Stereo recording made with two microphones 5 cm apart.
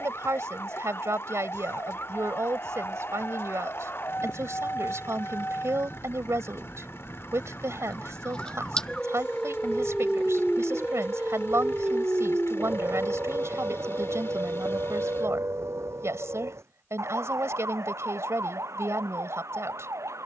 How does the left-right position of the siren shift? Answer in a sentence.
You can hear the siren go from the left side to the right.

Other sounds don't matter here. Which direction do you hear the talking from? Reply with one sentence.
You can hear the talking on the right.